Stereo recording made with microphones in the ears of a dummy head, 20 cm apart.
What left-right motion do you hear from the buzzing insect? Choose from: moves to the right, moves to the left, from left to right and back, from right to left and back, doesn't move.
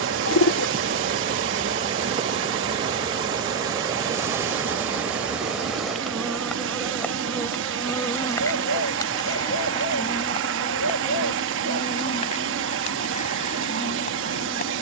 moves to the left.